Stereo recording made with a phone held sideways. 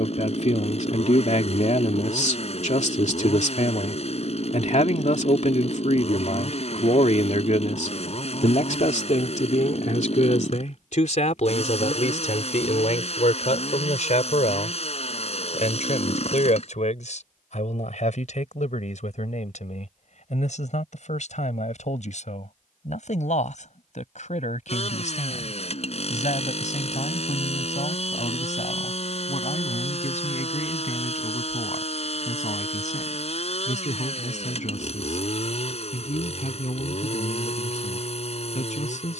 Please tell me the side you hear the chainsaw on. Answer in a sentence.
You can hear the chainsaw on the left.